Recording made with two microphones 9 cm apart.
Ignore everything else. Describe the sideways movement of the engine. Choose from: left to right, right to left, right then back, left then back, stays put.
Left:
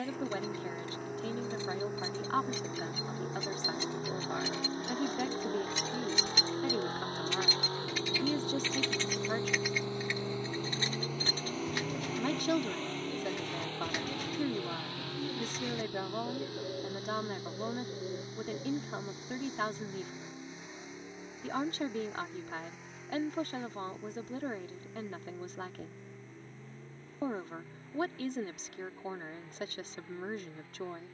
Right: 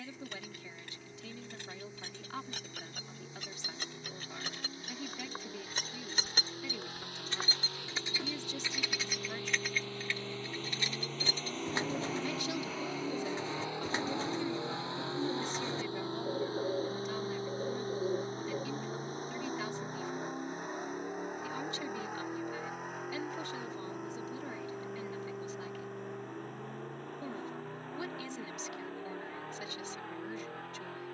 left to right.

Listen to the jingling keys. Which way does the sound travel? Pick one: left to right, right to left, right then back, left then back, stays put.
right to left.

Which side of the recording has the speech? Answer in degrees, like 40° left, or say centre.
50° left.